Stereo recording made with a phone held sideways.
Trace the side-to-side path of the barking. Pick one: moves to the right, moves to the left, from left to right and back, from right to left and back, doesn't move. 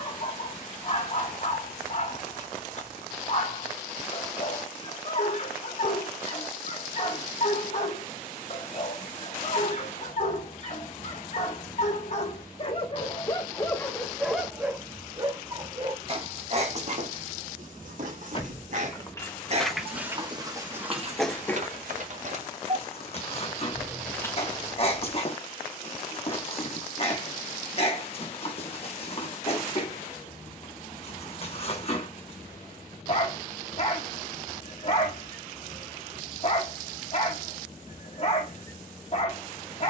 from left to right and back.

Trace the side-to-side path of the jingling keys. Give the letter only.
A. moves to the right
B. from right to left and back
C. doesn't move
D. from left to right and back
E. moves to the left
D.